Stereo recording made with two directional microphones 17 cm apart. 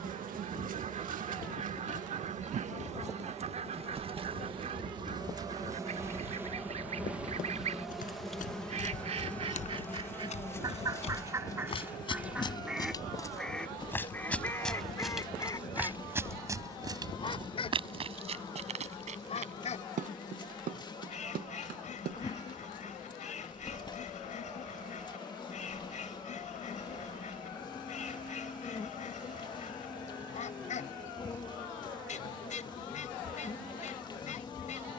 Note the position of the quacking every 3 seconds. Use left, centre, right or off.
right, right, right, right, centre, left, left, left, left, left, left, left.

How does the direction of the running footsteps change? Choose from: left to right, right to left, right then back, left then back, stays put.
left to right.